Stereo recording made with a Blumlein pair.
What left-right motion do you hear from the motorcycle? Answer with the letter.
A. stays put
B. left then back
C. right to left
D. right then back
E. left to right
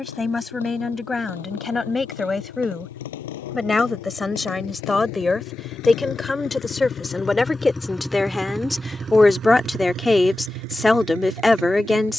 E.